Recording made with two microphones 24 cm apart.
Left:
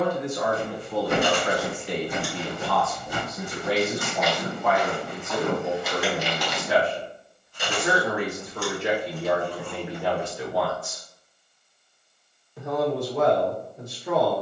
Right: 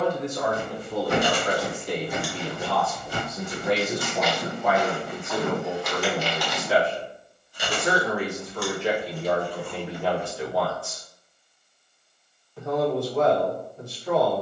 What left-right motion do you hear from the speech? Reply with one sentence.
You can hear the speech move from right to left.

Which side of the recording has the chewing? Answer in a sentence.
You can hear the chewing in the centre.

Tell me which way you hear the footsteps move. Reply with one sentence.
In this clip you hear the footsteps go right and come back.